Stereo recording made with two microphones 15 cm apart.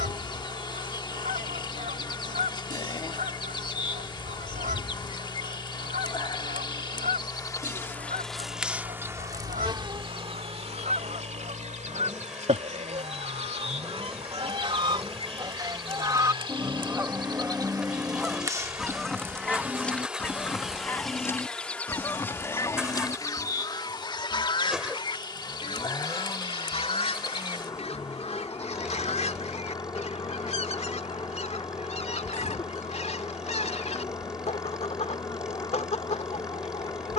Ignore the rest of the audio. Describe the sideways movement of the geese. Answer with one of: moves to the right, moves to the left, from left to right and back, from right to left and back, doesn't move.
moves to the left.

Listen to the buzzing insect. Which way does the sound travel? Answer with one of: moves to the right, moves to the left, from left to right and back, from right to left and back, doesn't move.
from left to right and back.